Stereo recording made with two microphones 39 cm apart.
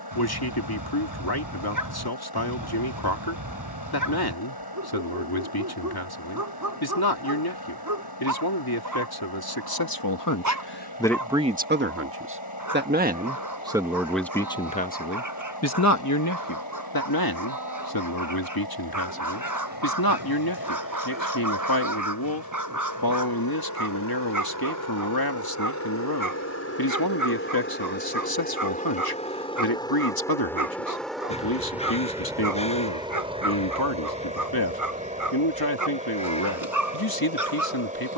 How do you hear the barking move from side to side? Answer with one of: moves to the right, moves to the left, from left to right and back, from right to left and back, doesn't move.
doesn't move.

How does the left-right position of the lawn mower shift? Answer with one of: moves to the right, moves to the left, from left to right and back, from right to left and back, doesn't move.
moves to the right.